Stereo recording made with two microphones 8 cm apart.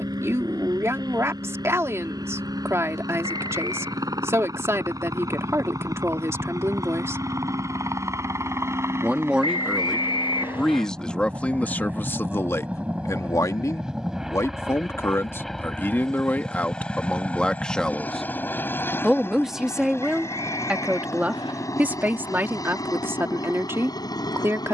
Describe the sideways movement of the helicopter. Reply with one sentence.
In this clip you hear the helicopter move to the left.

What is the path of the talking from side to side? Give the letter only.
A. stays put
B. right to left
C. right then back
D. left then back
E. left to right
D.